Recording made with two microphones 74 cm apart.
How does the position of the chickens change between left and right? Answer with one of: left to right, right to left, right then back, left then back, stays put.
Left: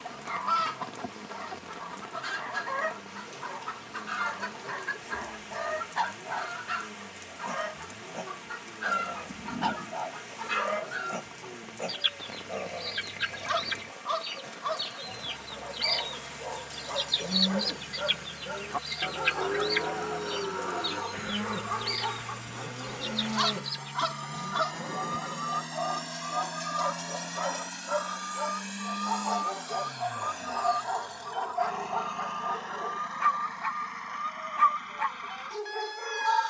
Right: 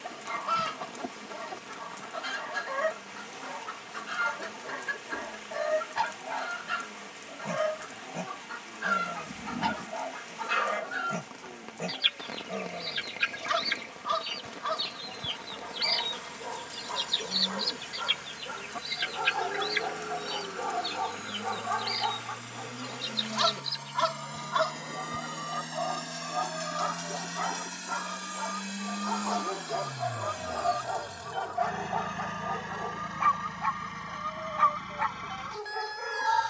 right then back.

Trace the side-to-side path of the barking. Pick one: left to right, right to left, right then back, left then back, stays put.
right to left.